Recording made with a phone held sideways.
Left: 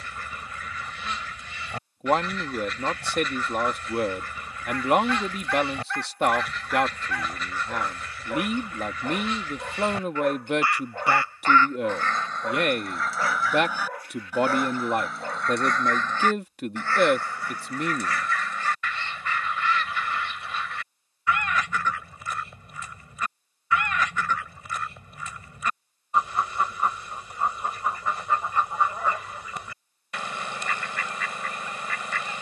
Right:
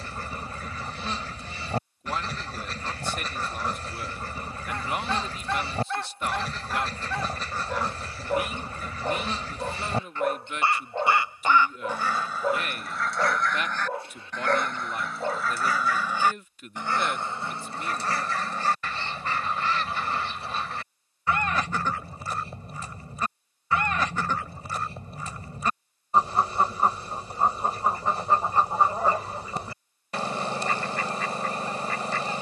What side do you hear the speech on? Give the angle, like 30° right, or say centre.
80° left.